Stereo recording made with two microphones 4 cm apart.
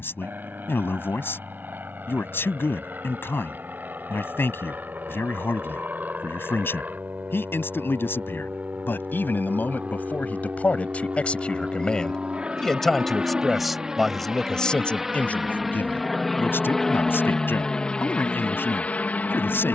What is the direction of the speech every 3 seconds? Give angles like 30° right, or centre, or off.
60° left, 60° left, 50° left, 30° left, 10° left, 50° left, 50° left.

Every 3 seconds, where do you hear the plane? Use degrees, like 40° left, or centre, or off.
50° right, 50° right, 40° right, 30° right, 20° right, 10° left, 30° left.